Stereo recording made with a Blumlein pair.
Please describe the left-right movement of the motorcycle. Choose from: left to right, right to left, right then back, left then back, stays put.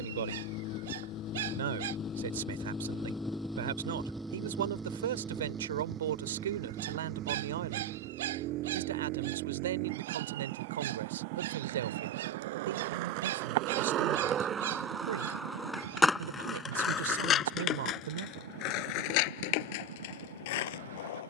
left to right.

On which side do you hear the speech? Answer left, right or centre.
right.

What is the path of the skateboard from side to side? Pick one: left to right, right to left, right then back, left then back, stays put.
right to left.